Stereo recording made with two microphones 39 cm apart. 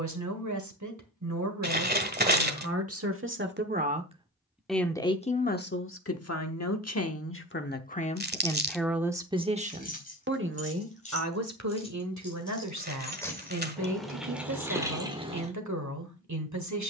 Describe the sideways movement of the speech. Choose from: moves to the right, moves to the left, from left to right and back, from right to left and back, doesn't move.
from right to left and back.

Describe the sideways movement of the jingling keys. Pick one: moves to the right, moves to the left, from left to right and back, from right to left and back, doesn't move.
moves to the right.